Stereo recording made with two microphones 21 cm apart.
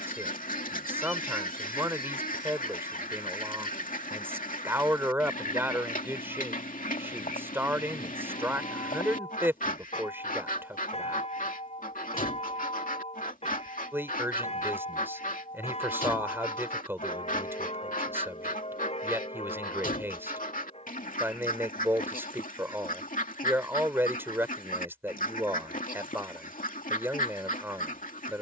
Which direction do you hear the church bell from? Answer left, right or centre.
left.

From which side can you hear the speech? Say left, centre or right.
centre.